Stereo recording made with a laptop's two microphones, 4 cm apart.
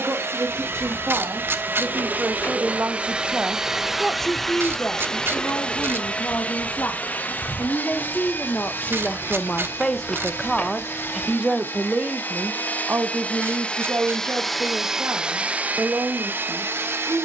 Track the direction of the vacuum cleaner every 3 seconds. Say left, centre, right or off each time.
right, centre, left, left, left, right.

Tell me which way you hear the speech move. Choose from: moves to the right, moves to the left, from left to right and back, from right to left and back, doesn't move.
from right to left and back.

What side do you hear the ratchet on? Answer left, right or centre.
right.